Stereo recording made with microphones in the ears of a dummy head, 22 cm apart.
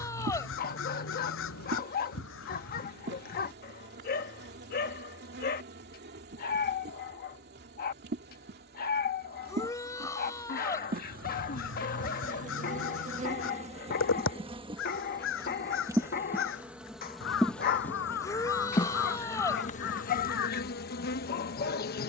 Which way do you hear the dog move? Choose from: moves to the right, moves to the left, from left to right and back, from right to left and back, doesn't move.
doesn't move.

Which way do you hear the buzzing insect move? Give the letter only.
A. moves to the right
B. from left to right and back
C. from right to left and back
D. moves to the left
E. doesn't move
D.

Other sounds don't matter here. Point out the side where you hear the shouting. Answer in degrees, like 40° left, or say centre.
10° left.